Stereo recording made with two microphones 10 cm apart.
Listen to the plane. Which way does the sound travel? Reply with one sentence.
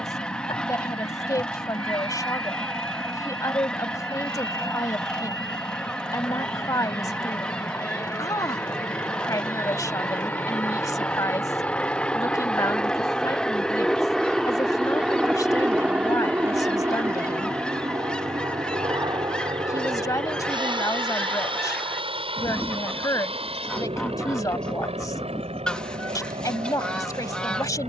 You can hear the plane move to the right.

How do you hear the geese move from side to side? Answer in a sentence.
In this clip you hear the geese stay put.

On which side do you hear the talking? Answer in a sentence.
In this clip you hear the talking on the left.